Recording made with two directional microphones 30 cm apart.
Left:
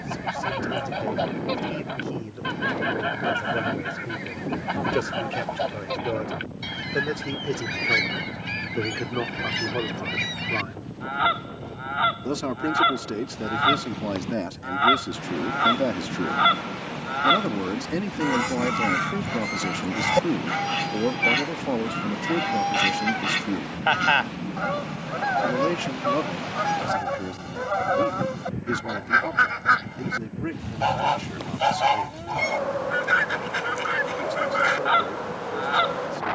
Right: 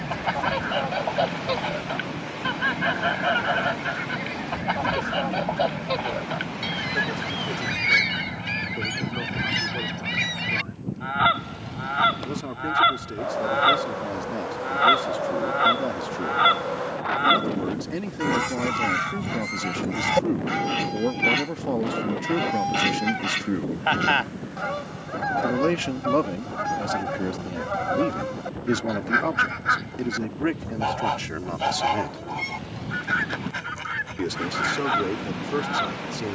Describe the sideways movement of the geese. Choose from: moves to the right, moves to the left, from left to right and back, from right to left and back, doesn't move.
moves to the left.